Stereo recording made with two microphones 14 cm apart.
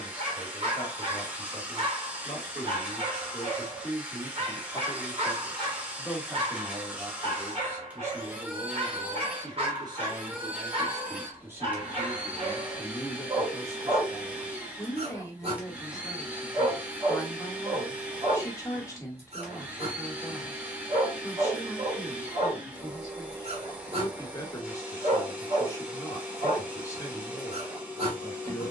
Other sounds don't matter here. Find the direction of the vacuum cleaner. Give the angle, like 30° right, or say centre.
10° right.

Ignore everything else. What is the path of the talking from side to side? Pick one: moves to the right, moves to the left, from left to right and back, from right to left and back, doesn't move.
from left to right and back.